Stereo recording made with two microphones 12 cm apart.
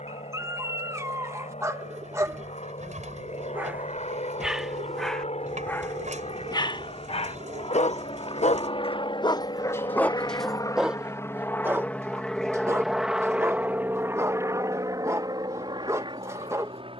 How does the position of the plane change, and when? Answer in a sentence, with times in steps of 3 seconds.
You can hear the plane on the left from 0 s, in the centre from 12 s and on the right from 15 s.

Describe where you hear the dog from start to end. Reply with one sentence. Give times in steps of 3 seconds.
You can hear the dog on the right from 0 s, in the centre from 3 s, on the left from 6 s, in the centre from 9 s and on the right from 12 s.